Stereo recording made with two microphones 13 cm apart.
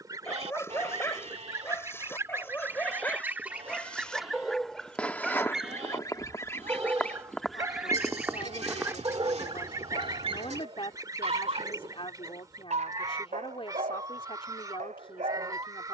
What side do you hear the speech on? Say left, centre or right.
left.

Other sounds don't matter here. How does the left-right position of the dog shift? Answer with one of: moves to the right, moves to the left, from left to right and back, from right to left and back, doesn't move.
moves to the right.